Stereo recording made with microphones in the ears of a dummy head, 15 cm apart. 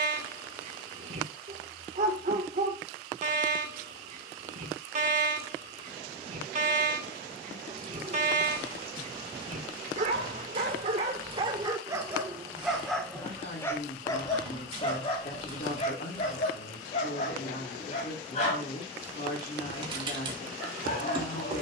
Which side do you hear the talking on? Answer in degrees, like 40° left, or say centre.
50° left.